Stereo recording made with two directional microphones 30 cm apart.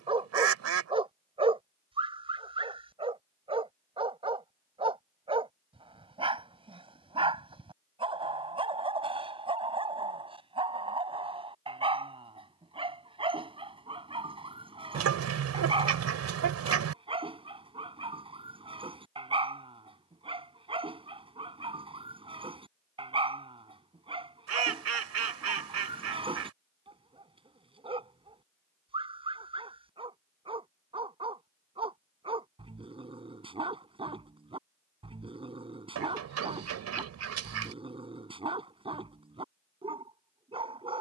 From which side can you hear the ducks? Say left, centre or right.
right.